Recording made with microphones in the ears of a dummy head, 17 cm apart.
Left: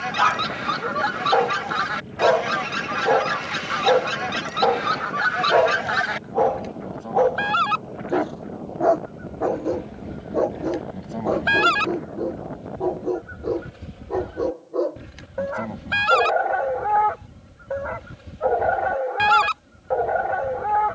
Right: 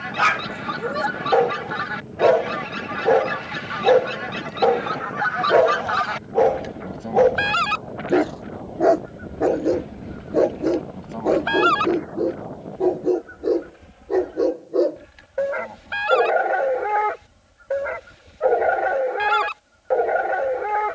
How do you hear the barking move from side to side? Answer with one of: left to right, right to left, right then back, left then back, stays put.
stays put.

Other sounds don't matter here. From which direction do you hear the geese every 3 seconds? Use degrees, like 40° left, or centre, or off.
60° left, 50° left, 20° right, 10° left, 40° left, 60° left, 60° left.